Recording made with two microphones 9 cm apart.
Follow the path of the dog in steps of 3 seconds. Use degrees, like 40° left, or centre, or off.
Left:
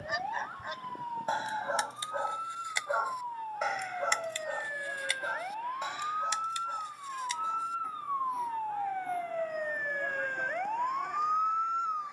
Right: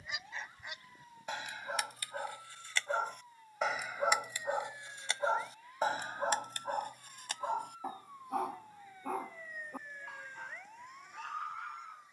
30° left, 20° right, 50° right, 70° right.